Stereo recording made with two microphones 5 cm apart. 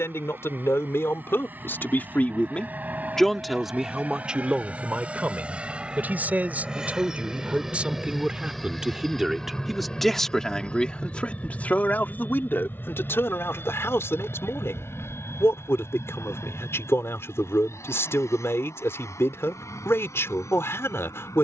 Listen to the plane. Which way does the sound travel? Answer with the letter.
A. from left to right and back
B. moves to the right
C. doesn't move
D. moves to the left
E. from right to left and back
D.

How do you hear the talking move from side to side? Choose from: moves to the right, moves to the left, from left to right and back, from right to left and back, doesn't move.
from left to right and back.